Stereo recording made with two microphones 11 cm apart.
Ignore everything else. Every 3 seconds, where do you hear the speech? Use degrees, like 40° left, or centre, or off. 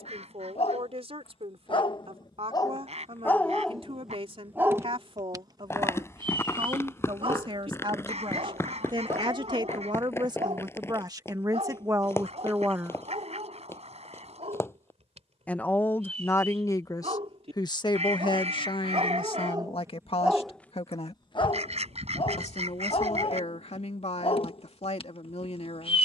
60° right, 60° right, 50° right, 40° right, 20° right, 30° left, 50° left, 70° left, 70° left.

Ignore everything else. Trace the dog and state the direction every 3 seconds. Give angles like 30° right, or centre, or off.
50° left, 10° right, 50° right, 70° right, 70° right, 70° right, 40° right, 50° left, 60° left.